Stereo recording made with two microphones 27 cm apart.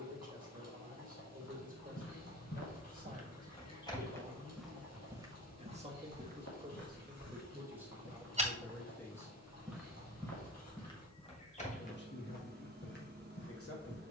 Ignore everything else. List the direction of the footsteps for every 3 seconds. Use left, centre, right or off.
left, centre, right, centre, left.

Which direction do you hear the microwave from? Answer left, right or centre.
right.